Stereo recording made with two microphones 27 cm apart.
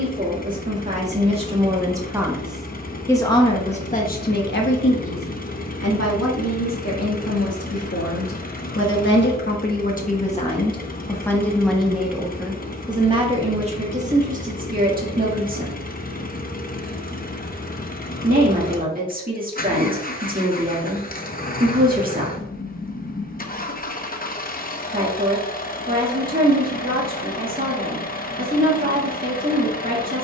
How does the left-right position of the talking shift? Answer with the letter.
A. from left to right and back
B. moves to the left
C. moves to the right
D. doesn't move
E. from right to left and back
E.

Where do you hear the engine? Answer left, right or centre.
left.